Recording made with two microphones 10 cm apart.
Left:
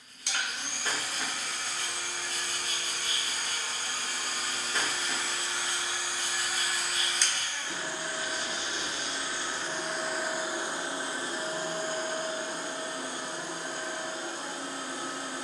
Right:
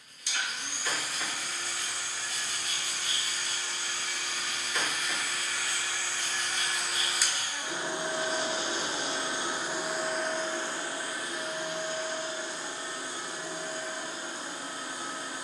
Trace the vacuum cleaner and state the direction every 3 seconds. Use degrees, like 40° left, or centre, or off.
60° left, 40° left, 10° right, 10° left, 50° left.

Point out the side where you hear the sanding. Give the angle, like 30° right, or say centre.
30° left.